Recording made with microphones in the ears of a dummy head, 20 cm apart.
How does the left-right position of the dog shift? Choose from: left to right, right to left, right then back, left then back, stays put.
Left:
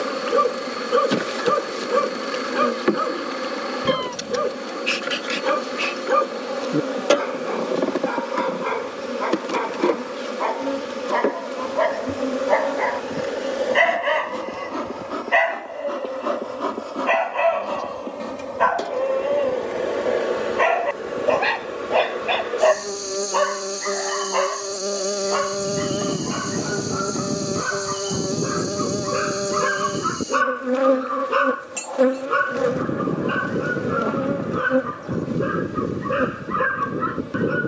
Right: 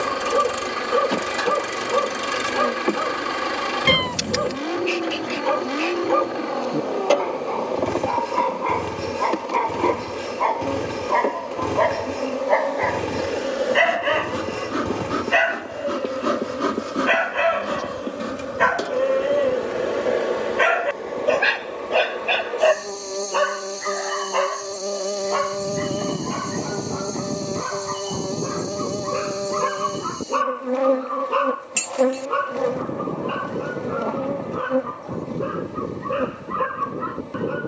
right then back.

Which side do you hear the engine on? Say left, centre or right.
right.